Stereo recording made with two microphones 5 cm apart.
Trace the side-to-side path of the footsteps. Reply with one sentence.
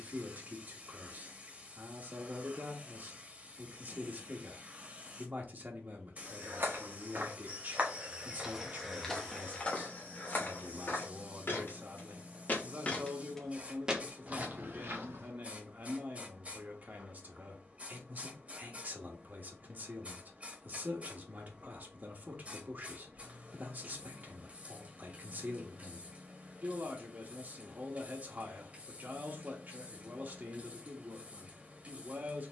You can hear the footsteps move from right to left and back again.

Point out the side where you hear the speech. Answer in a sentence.
In this clip you hear the speech on the right.